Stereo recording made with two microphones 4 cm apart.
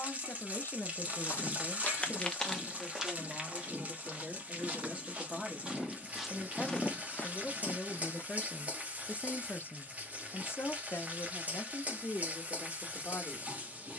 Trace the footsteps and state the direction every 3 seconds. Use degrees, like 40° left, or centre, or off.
30° left, 30° right, 30° left, off, off.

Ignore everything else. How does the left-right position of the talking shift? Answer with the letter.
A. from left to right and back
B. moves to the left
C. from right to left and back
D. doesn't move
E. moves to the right
A.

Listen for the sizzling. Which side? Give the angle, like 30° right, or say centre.
30° right.